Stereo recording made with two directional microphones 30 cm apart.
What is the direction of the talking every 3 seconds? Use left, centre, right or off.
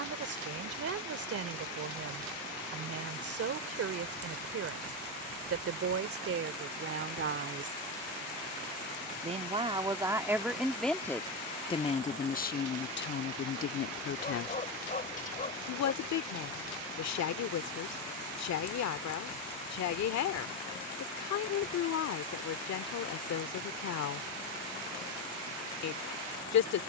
right, right, right, centre, left, left, left, left, left.